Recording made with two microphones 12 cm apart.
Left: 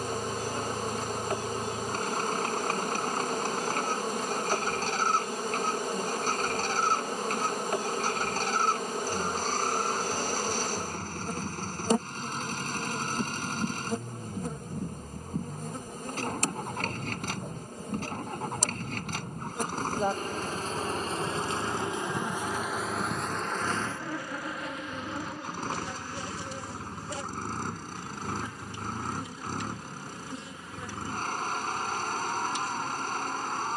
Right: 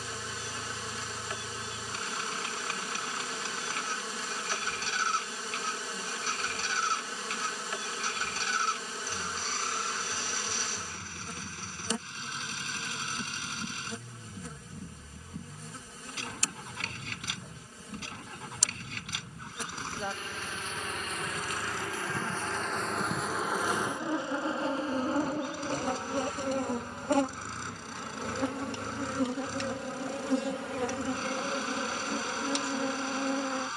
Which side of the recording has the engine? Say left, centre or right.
left.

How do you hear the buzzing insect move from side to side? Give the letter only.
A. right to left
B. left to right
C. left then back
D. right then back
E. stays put
B.